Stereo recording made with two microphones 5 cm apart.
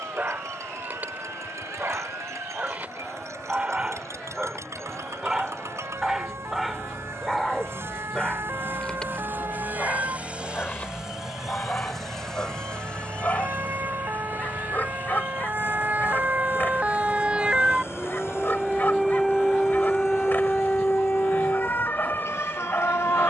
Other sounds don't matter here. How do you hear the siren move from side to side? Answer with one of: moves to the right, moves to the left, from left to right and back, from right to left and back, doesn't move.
moves to the left.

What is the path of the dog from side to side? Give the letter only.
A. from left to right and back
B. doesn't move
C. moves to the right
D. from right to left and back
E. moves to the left
E.